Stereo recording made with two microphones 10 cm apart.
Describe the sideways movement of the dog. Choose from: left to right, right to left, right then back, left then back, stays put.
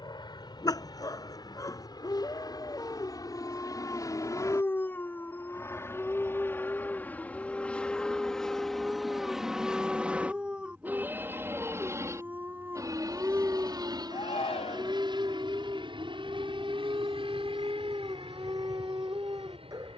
left to right.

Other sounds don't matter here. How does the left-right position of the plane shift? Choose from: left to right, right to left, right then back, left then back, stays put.
left to right.